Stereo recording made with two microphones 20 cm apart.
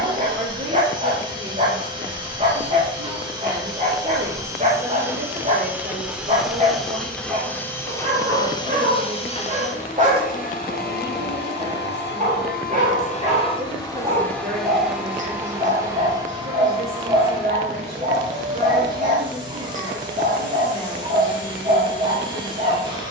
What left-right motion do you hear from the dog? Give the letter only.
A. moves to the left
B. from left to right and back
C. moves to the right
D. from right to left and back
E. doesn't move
E.